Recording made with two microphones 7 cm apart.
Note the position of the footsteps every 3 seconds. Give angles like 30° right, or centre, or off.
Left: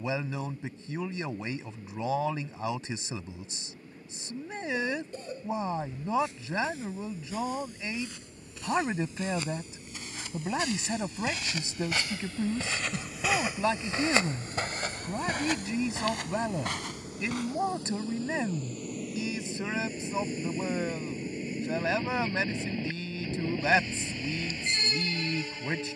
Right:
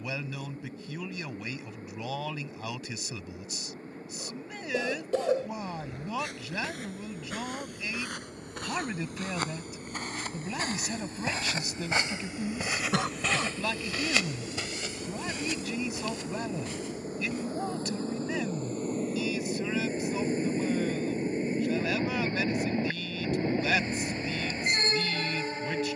off, 60° right, 60° right, 40° right, 10° left, 60° left, off, off, off.